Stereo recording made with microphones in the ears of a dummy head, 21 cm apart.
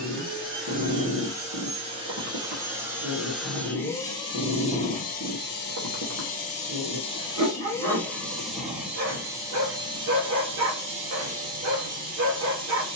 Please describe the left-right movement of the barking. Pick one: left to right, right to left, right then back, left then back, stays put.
stays put.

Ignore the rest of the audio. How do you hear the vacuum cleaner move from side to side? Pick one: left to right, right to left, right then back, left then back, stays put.
left then back.